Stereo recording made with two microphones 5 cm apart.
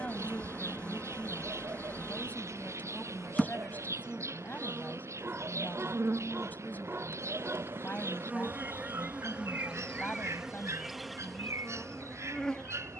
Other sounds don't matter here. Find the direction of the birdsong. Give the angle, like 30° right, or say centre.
60° right.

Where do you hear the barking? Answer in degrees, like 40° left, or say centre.
40° right.